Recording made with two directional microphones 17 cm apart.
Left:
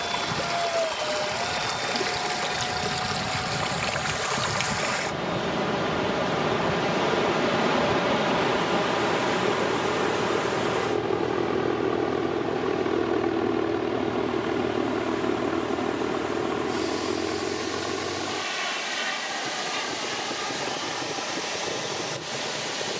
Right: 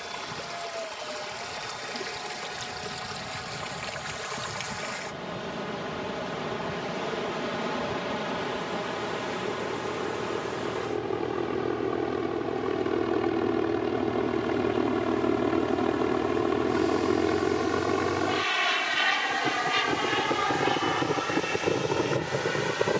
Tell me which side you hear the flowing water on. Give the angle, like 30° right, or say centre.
50° left.